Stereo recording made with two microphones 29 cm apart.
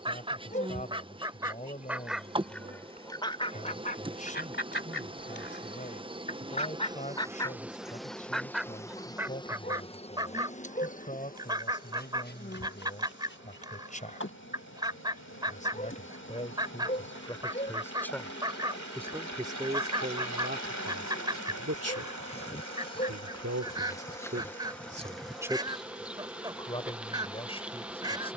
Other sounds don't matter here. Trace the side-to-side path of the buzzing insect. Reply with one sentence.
You can hear the buzzing insect go left and come back.